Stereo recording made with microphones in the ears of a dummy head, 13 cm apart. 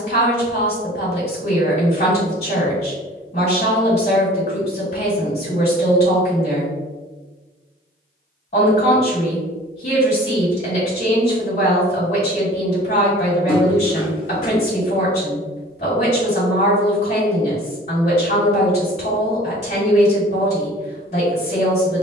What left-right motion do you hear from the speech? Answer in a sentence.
You can hear the speech stay in one place.